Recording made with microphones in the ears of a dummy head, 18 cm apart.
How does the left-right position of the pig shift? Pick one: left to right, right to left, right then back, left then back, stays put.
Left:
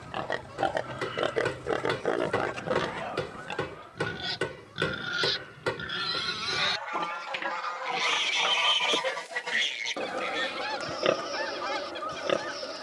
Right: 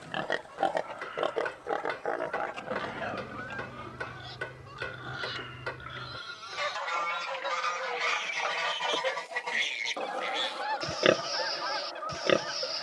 left then back.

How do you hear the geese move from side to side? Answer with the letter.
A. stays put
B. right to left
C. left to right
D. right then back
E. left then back
D.